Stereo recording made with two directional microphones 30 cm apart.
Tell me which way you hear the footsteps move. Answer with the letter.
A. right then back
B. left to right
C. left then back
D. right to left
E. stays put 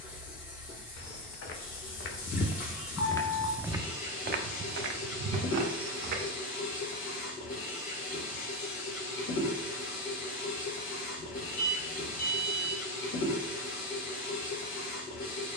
B.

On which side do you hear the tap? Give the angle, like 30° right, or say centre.
50° left.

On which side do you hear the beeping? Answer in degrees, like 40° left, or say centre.
60° left.